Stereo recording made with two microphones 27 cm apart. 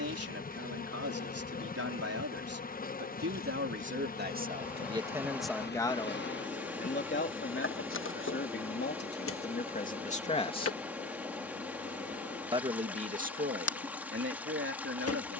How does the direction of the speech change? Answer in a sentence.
In this clip you hear the speech go left and come back.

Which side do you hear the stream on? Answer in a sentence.
In this clip you hear the stream in the centre.